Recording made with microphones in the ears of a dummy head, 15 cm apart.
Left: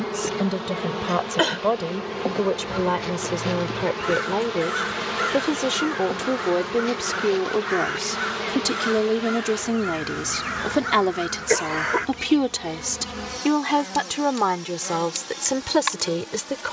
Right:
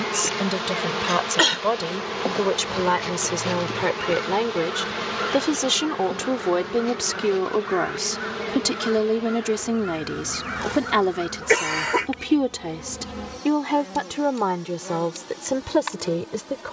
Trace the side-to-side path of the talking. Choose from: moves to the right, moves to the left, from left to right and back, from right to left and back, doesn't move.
moves to the left.